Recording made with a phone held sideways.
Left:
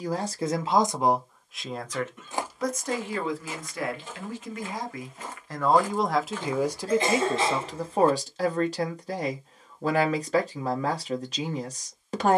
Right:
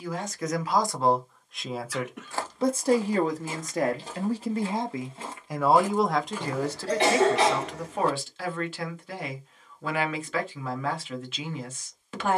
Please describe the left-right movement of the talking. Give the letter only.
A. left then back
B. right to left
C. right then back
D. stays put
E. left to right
C.